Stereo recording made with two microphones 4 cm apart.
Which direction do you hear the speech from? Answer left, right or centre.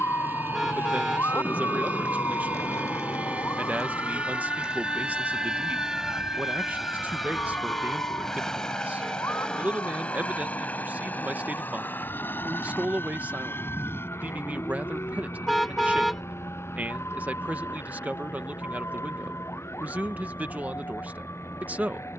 right.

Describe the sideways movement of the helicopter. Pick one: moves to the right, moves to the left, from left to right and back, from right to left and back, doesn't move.
moves to the left.